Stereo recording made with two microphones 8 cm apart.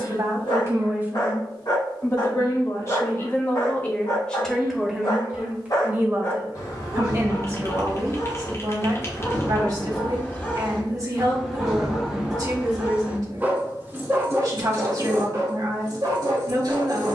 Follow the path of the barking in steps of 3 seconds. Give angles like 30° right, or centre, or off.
60° left, 50° left, 40° left, 10° left, 20° right, 50° right.